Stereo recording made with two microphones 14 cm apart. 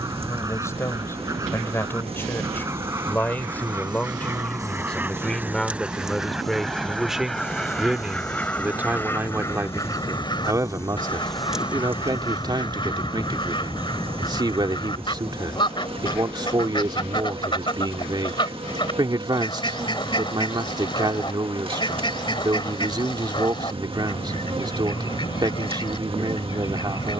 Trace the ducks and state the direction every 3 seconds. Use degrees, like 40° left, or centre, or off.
20° right, 10° right, centre, 30° left, 40° left, 40° left, 40° left, 40° left, 40° left.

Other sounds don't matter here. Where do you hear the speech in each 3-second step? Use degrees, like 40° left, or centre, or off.
20° left, 10° left, 10° right, 20° right, 30° right, 30° right, 30° right, 30° right, 30° right.